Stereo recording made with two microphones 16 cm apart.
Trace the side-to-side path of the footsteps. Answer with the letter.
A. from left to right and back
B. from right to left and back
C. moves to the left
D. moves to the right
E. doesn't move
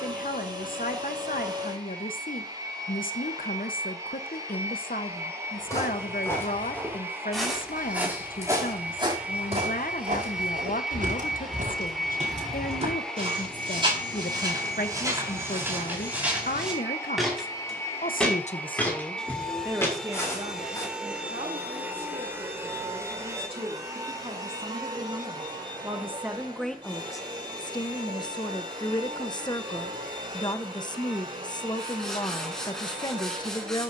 A.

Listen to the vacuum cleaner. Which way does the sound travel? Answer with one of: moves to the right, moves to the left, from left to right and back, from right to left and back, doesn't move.
from right to left and back.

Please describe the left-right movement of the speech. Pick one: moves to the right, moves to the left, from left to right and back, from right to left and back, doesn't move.
from left to right and back.